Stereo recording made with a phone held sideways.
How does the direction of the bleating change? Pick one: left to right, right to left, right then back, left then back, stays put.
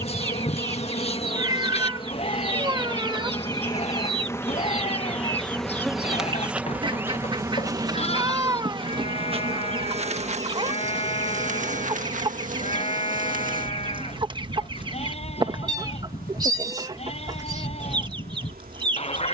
stays put.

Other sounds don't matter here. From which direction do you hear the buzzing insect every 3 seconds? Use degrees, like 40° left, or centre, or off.
40° left, 10° left, 20° right, 50° right, 60° right, 70° right, 80° right.